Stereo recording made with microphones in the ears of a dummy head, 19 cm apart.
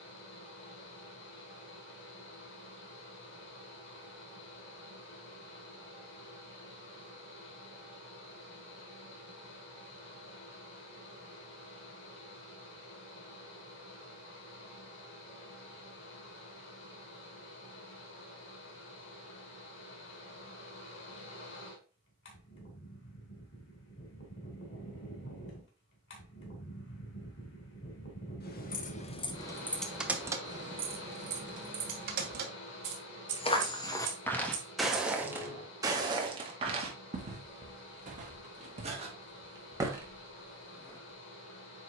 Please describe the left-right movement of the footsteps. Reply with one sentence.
In this clip you hear the footsteps go right and come back.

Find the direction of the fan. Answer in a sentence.
You can hear the fan on the left.